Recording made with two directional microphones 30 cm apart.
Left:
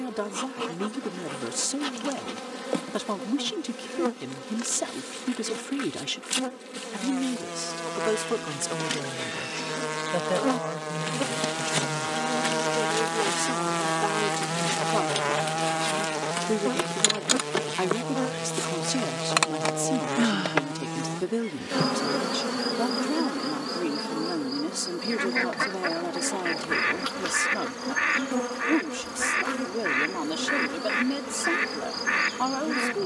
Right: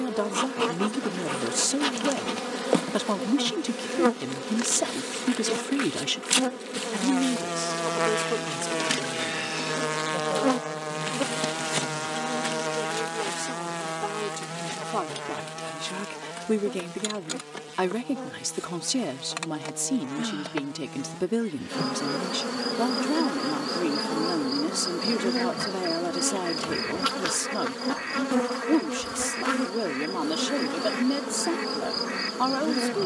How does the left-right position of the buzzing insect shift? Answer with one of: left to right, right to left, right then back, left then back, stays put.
left then back.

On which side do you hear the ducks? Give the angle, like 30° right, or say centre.
60° left.